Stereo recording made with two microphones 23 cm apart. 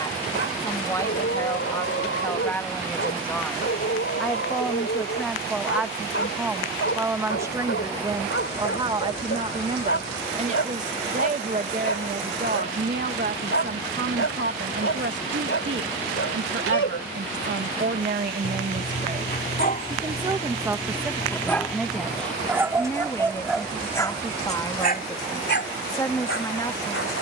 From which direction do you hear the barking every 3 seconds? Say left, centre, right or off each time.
left, left, left, left, left, left, left, centre, left.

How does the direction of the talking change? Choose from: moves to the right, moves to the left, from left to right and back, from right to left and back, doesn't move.
from left to right and back.